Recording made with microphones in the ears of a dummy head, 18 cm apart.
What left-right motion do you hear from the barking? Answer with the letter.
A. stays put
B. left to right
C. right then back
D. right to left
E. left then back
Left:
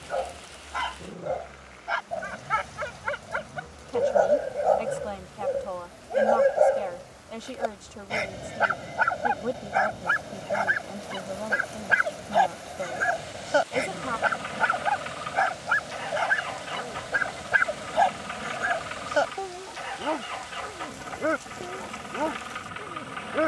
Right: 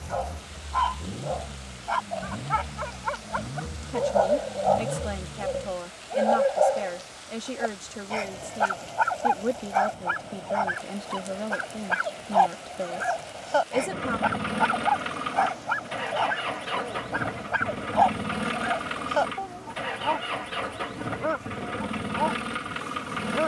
A.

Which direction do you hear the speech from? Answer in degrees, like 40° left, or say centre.
20° right.